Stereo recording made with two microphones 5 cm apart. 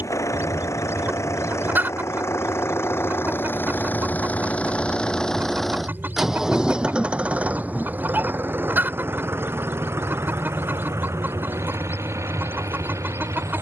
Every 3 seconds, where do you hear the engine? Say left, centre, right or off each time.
left, left, right, right, right.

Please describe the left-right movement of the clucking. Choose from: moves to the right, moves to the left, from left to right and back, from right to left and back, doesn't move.
doesn't move.